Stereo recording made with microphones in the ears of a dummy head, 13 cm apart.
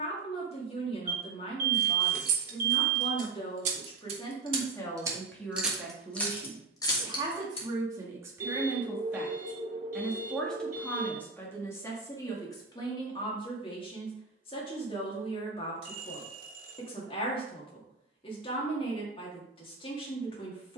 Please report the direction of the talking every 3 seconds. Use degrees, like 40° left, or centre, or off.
40° left, 20° left, 20° right, 10° left, 30° left, 30° left, 30° left.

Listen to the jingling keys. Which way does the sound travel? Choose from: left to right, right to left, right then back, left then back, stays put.
right to left.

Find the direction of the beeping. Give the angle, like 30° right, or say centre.
50° right.